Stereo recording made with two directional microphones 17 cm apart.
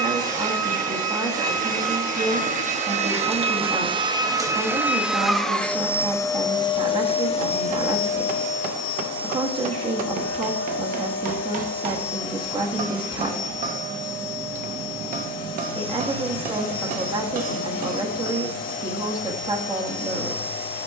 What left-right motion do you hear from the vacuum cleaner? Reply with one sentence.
You can hear the vacuum cleaner go from the right side to the left.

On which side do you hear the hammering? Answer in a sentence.
You can hear the hammering on the right.